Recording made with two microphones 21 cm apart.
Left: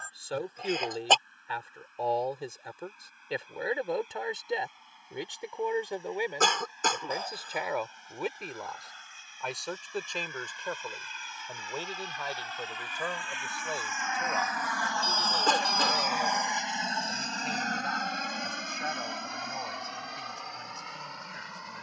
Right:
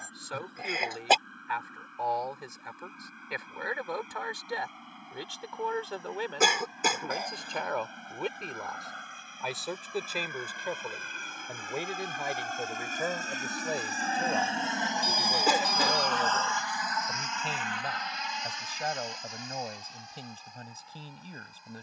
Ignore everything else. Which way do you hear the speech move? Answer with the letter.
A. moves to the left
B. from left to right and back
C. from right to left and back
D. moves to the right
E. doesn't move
D.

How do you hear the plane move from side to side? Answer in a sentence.
In this clip you hear the plane go from the right side to the left.